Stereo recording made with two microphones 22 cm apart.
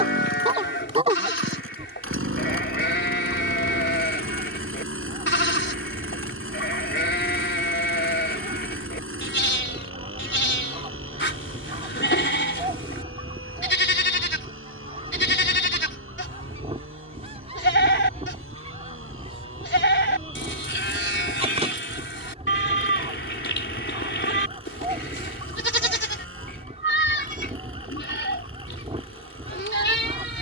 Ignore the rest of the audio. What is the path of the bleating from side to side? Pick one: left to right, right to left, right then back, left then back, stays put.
stays put.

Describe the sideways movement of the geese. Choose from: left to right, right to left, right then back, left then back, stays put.
stays put.